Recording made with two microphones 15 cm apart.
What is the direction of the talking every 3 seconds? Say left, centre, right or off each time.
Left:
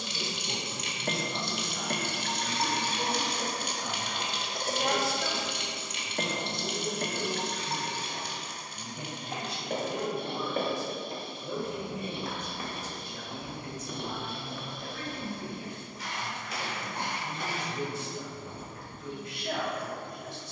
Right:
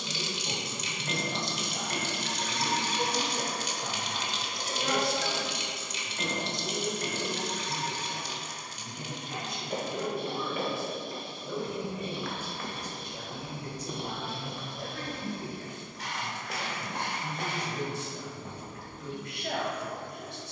right, centre, left, left, right, right, right.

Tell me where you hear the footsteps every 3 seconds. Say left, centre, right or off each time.
off, off, off, left, centre, right, right.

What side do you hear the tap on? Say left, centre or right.
left.